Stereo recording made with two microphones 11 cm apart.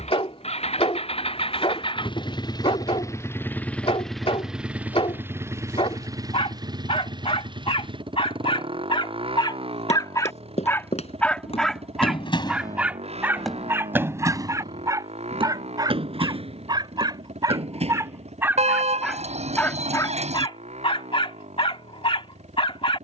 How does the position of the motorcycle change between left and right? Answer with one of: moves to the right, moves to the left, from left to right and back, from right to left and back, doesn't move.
moves to the right.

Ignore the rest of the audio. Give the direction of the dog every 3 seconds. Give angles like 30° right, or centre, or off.
60° left, 60° left, 60° left, 30° left, 20° right, 30° right, 20° left, 50° left.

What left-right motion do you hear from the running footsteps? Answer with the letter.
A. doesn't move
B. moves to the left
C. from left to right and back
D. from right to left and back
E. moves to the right
E.